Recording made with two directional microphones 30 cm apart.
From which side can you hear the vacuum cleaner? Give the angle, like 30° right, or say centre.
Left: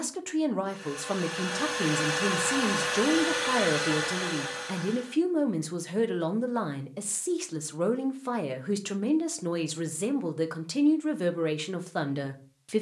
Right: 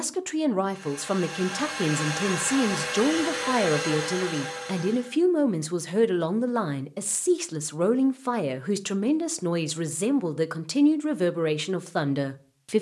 10° left.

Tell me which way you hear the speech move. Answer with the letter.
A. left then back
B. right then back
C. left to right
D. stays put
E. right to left
D.